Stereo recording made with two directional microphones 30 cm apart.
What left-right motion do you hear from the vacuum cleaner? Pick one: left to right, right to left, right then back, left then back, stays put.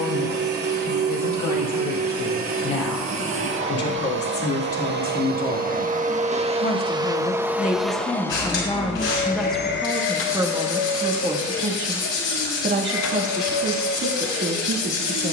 right to left.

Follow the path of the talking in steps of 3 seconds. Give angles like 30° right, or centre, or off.
60° left, 50° left, 20° left, 10° right, 40° right.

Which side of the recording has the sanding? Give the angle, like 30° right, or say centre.
50° left.